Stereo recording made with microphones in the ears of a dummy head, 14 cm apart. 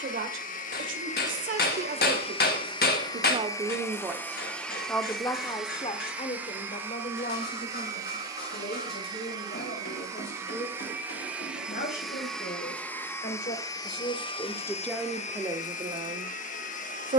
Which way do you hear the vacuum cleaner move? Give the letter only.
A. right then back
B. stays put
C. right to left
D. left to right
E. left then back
A.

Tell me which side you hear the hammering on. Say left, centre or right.
left.